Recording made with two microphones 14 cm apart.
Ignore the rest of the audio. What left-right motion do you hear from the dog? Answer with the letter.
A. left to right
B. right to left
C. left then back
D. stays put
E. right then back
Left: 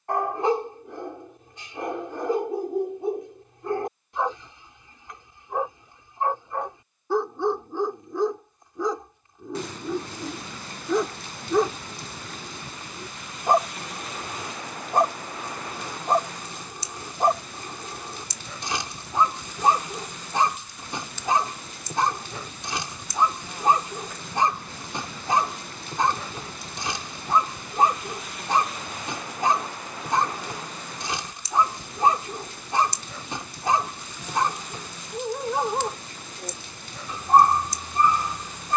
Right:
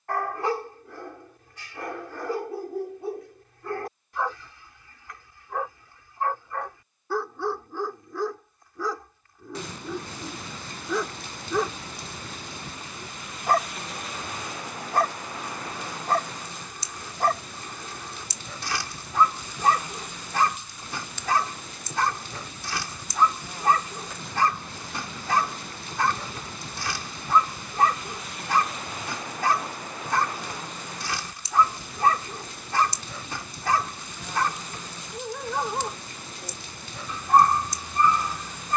D.